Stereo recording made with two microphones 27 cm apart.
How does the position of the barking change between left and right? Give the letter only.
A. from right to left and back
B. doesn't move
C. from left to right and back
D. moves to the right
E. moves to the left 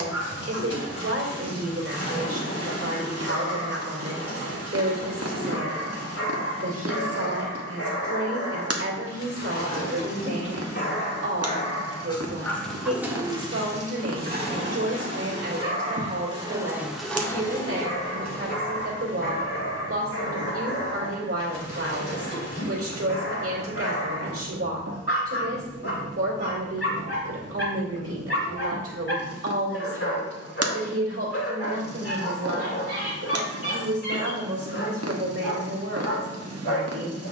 C.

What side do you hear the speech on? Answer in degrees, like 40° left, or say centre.
60° right.